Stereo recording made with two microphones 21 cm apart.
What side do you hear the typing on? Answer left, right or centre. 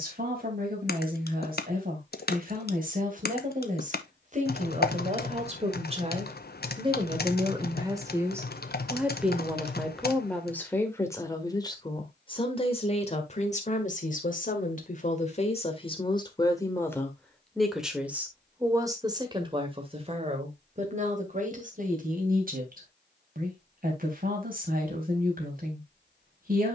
left.